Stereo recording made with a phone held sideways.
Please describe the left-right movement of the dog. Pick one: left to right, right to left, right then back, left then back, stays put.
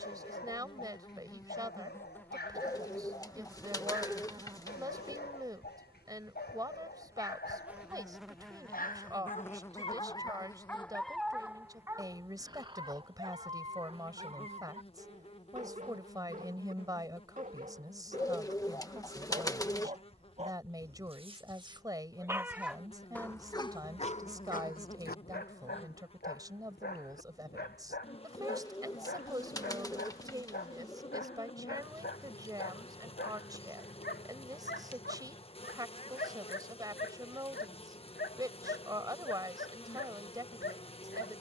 right then back.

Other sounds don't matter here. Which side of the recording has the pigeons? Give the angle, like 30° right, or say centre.
20° left.